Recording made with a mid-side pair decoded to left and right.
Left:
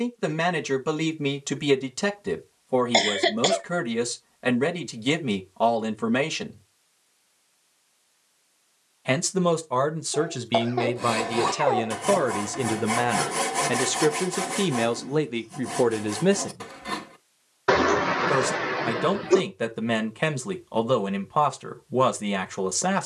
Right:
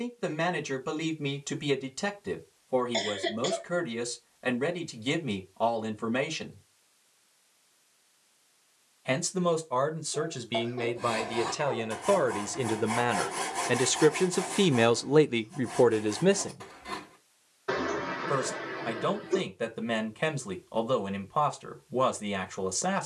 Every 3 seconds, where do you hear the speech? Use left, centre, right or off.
left, left, left, left, centre, centre, left, left.